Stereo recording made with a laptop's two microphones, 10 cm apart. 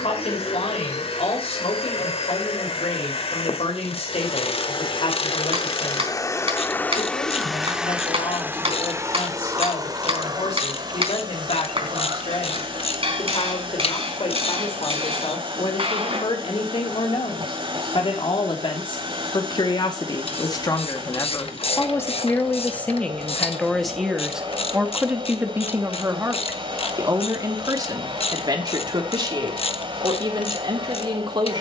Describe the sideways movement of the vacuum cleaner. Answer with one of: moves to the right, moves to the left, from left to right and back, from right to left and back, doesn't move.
moves to the right.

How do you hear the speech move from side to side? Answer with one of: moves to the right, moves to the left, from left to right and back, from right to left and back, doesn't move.
moves to the right.